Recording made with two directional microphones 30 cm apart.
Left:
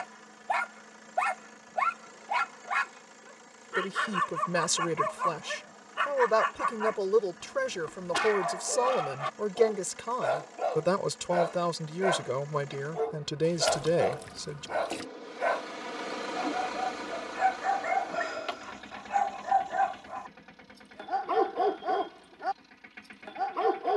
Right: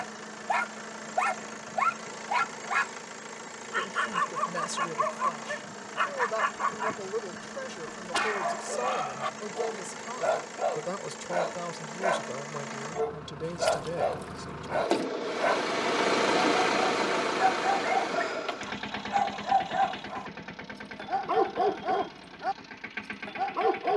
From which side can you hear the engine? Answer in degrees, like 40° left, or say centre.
70° right.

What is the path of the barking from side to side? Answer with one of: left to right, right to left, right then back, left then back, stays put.
stays put.